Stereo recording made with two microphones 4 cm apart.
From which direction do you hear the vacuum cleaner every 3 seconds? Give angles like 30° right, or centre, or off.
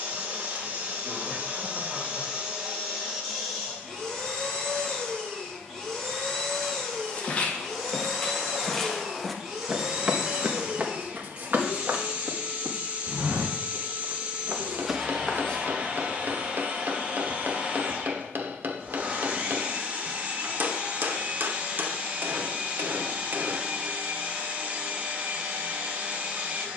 30° right, 10° left, centre, 20° right, 30° right, 30° right, 30° right, 30° right, 30° right.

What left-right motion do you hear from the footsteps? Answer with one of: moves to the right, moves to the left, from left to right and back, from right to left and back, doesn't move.
from left to right and back.